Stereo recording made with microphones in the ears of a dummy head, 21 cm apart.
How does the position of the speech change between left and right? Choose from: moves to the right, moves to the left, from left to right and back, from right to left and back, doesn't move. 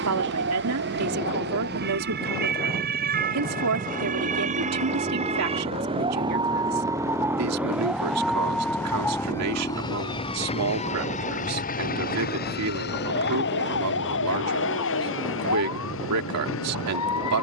doesn't move.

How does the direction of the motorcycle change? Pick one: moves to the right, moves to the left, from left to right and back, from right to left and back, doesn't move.
moves to the left.